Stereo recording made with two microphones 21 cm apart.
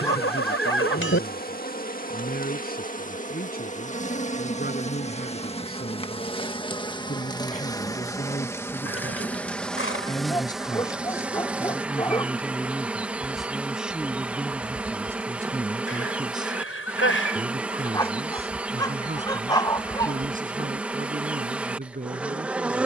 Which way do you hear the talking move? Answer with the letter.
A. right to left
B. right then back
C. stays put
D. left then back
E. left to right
E.